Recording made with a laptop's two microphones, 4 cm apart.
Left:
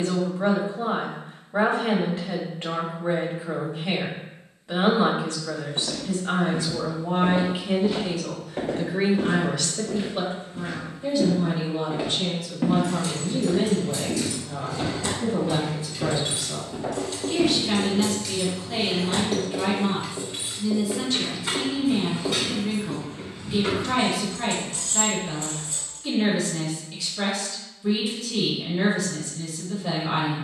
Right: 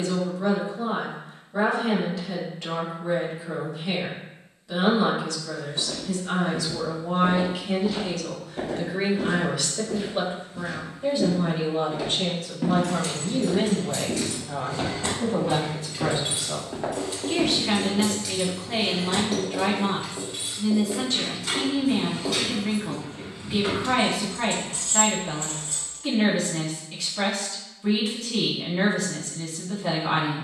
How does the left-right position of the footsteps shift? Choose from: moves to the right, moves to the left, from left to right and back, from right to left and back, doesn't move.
moves to the right.